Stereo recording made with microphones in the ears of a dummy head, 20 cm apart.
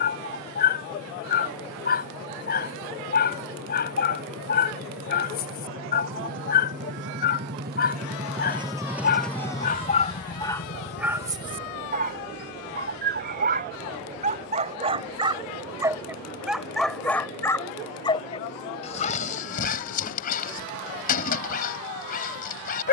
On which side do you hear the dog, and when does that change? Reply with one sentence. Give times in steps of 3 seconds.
You can hear the dog on the left from 0 s, in the centre from 9 s, on the right from 12 s, in the centre from 15 s and on the left from 18 s.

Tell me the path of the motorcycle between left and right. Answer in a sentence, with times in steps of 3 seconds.
In this clip you hear the motorcycle on the right from 0 s and on the left from 9 s.